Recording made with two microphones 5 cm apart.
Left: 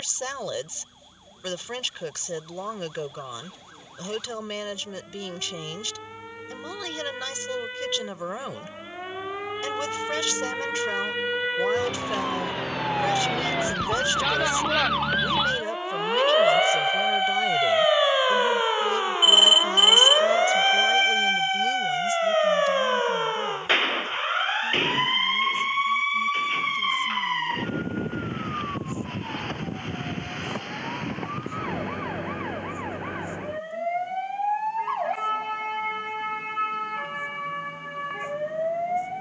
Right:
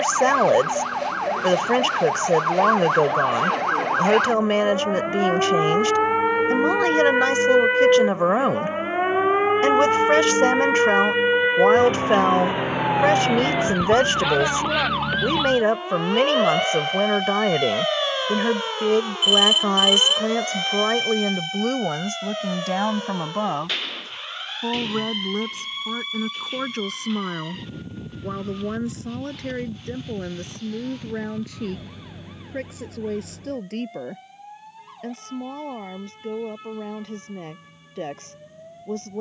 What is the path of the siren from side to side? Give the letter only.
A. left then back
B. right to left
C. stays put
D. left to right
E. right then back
B.